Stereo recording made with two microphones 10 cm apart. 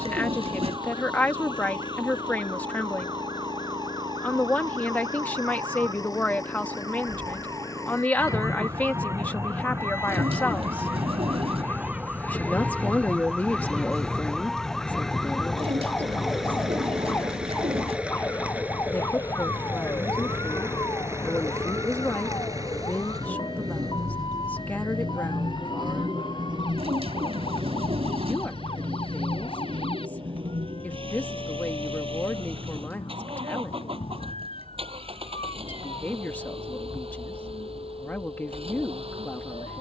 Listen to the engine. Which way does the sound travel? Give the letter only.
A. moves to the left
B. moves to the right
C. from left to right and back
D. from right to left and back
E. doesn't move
B.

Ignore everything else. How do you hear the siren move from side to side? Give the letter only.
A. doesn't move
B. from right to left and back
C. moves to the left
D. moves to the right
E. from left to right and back
C.